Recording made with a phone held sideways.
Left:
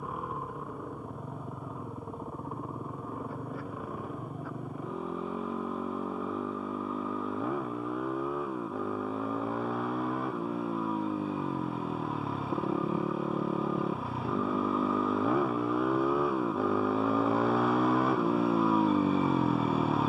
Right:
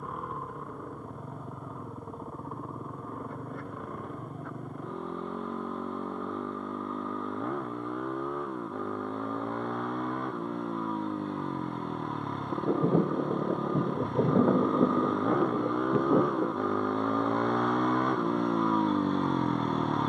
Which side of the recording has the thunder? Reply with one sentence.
In this clip you hear the thunder on the right.